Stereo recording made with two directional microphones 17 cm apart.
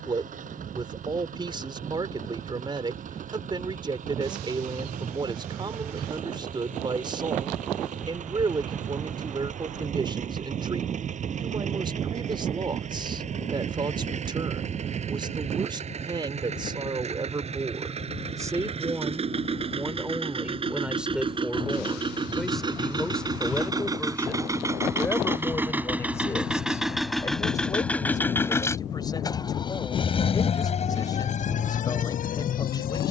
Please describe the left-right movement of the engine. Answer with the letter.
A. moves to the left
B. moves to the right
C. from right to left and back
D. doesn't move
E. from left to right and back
A.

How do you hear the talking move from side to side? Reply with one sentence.
In this clip you hear the talking go from the right side to the left.